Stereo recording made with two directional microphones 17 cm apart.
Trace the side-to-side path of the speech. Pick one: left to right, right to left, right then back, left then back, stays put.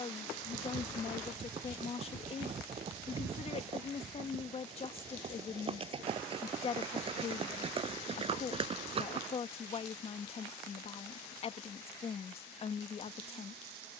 stays put.